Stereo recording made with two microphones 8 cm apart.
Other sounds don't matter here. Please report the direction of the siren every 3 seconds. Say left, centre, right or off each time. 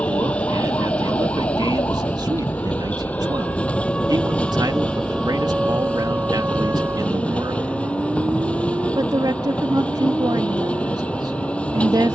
left, centre, right, right.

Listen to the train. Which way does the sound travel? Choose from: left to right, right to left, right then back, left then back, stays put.
stays put.